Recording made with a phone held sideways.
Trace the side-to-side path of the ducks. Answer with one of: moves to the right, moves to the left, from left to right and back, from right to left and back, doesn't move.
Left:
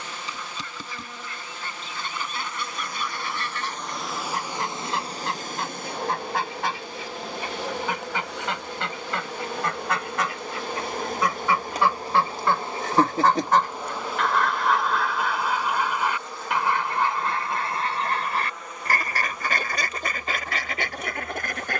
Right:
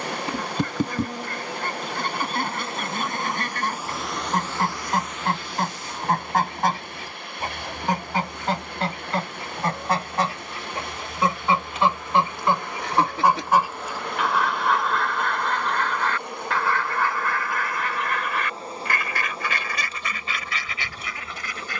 moves to the left.